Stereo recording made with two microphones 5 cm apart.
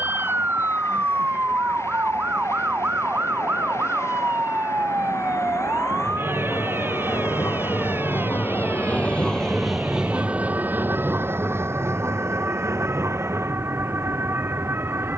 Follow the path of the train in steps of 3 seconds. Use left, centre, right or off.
left, left, left, right, right.